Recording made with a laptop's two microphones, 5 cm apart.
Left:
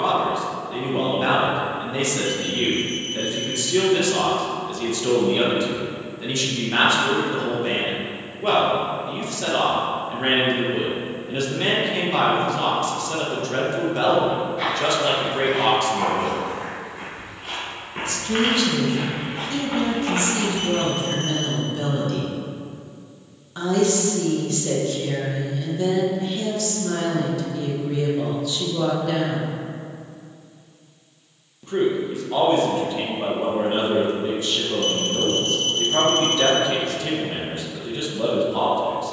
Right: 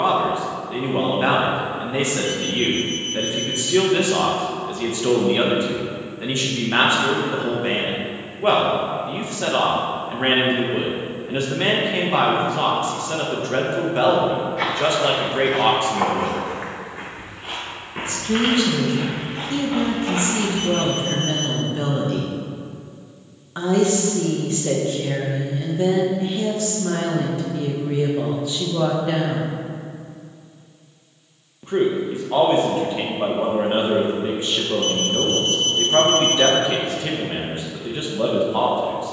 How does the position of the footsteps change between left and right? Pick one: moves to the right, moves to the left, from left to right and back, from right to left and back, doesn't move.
moves to the left.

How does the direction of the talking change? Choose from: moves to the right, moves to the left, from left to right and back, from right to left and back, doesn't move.
doesn't move.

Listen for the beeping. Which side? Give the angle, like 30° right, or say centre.
20° right.